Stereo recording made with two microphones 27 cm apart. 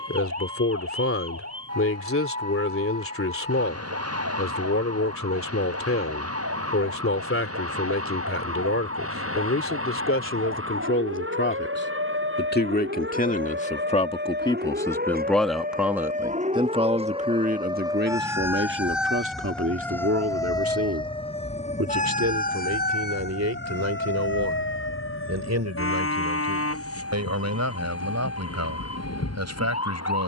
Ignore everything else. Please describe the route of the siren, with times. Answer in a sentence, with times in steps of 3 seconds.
You can hear the siren on the right from 0 s, in the centre from 18 s and on the left from 21 s.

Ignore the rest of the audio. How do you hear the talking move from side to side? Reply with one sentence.
In this clip you hear the talking go from the left side to the right.